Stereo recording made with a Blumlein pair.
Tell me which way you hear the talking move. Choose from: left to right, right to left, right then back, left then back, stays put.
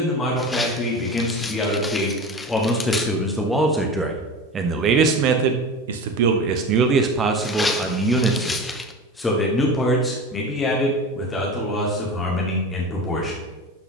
right then back.